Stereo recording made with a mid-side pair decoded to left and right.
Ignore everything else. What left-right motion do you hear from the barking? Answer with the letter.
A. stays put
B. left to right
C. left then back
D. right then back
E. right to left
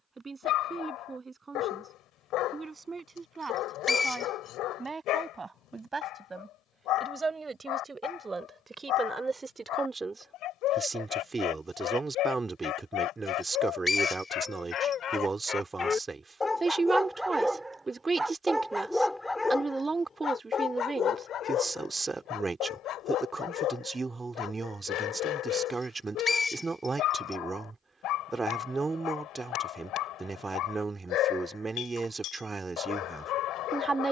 D.